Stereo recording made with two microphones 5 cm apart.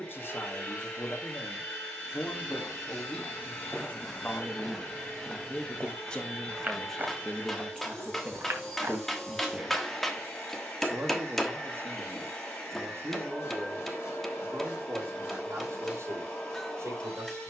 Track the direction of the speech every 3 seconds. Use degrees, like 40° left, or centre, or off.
50° left, 30° left, centre, 40° right, 60° right, 70° right.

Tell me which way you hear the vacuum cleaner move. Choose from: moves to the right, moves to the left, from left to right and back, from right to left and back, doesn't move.
doesn't move.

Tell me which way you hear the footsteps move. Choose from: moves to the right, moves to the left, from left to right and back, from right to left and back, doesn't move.
moves to the right.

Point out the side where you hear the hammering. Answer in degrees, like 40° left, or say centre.
centre.